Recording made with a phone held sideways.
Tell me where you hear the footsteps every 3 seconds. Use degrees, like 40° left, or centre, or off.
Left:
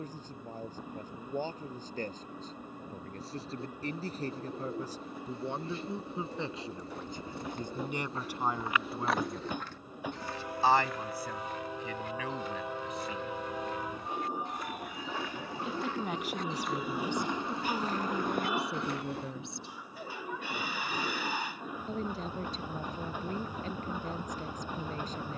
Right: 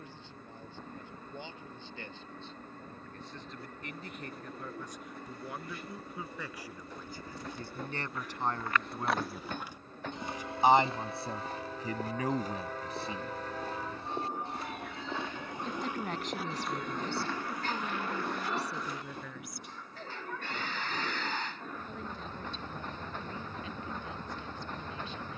off, off, 40° left, 20° right, 40° right, centre, 60° left, off, off.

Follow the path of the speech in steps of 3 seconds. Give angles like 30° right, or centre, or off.
40° left, 30° left, 20° left, 20° right, 30° right, 10° left, 30° left, 40° left, 40° left.